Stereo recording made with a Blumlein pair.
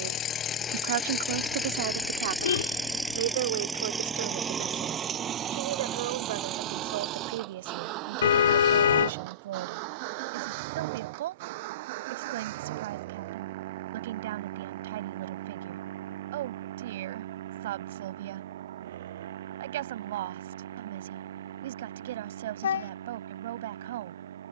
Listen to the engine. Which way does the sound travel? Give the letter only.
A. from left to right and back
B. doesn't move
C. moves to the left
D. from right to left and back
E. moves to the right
E.